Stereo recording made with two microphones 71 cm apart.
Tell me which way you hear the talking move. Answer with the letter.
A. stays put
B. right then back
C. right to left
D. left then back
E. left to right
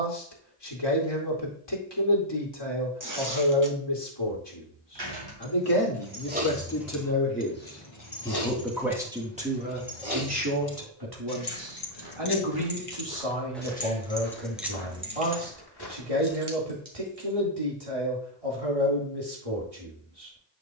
E.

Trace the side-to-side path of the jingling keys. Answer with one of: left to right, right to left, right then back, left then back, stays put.
left then back.